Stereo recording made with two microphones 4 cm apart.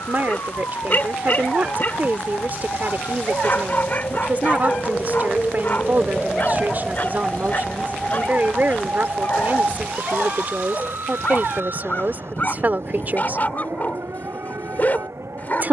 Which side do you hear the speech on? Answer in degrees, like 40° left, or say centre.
40° right.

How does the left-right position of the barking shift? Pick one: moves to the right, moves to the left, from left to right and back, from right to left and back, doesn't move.
doesn't move.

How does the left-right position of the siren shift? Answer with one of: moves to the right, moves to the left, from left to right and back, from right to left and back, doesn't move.
moves to the right.